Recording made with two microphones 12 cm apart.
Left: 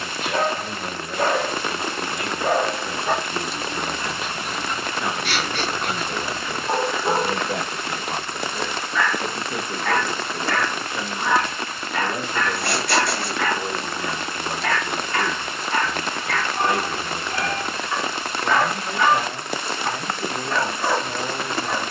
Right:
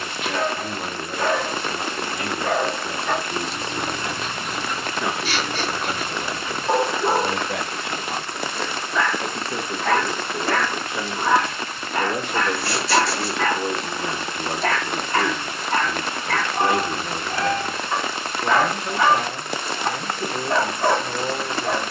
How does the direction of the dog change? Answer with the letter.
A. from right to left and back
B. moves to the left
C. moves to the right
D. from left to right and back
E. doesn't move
C.